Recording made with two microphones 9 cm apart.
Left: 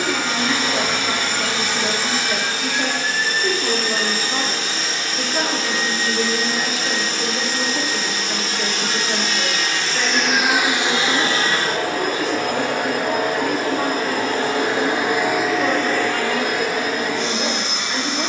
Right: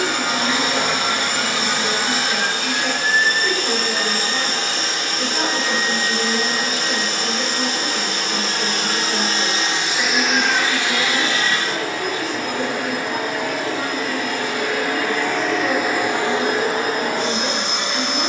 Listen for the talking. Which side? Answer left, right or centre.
left.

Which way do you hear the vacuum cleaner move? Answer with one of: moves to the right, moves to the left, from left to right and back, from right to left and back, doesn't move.
from right to left and back.